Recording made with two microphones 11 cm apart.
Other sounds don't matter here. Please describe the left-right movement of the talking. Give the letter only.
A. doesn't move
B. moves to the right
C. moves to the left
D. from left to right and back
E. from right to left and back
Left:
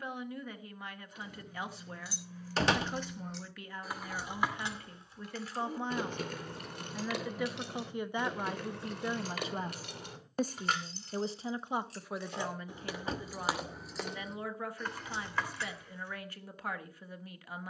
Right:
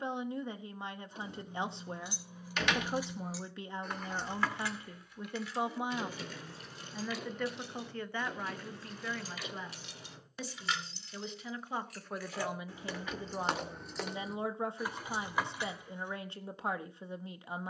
E.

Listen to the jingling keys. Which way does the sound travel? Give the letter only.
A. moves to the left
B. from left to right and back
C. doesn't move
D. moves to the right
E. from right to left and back
E.